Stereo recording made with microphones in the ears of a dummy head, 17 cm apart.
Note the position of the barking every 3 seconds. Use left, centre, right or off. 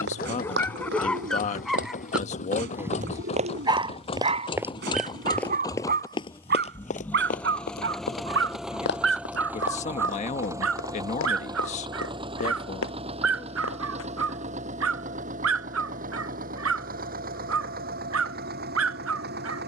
centre, right, right, right, right, right, right.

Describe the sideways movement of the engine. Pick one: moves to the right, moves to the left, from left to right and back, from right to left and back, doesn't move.
moves to the right.